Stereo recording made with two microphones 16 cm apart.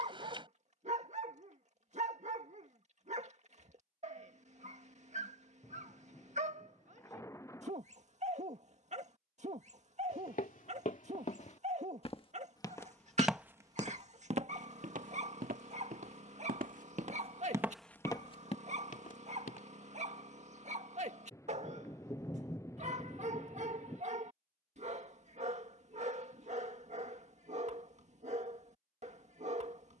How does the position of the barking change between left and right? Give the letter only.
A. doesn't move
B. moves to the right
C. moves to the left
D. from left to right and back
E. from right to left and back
A.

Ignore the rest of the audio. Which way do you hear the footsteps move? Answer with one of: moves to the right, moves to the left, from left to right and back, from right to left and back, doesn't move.
from left to right and back.